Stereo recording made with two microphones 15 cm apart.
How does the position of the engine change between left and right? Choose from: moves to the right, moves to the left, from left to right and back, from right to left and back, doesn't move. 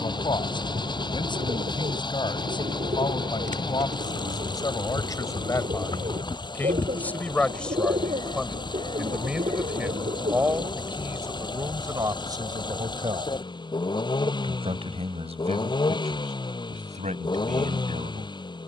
doesn't move.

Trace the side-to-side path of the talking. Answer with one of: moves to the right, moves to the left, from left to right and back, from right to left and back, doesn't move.
moves to the right.